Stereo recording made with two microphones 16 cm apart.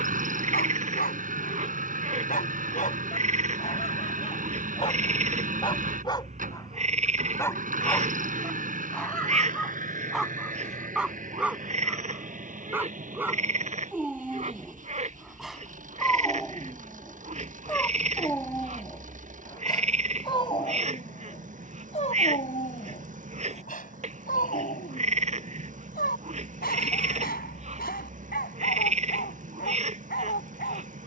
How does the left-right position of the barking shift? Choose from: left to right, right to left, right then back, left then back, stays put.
right then back.